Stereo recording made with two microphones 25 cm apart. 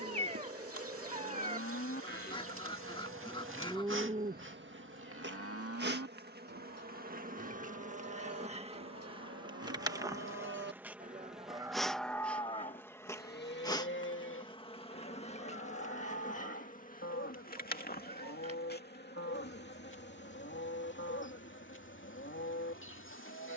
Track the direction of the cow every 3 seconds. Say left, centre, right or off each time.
left, right, right, right, left, left, left, left.